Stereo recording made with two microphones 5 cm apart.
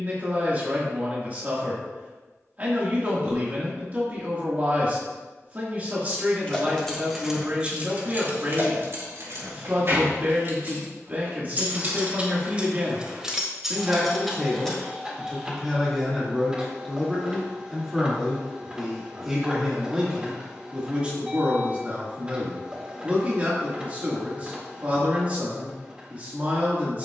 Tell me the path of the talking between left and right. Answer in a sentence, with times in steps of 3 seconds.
In this clip you hear the talking on the right from 0 s, in the centre from 15 s and on the right from 21 s.